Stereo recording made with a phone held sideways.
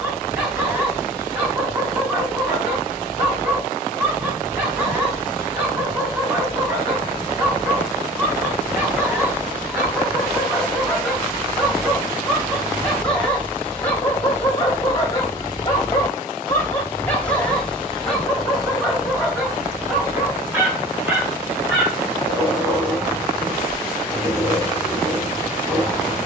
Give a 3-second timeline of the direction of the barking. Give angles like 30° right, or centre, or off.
10° right, 10° right, 10° right, 10° right, 10° left, 10° left, centre, 10° right, 10° right.